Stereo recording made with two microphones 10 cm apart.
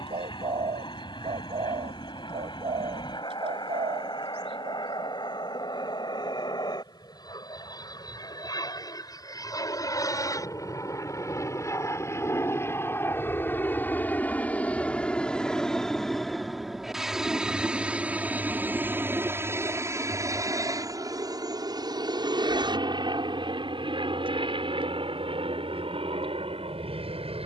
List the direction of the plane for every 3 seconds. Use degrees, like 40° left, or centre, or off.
50° left, 50° left, 40° left, 30° left, 20° left, centre, 20° right, 40° right, 60° right.